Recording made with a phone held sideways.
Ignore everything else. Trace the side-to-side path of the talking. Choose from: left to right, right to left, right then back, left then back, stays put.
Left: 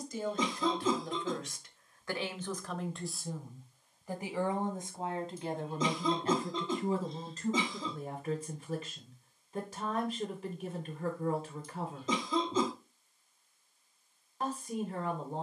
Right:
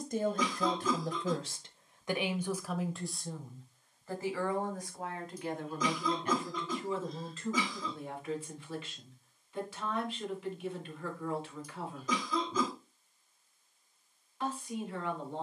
right to left.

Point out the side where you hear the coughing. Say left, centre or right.
left.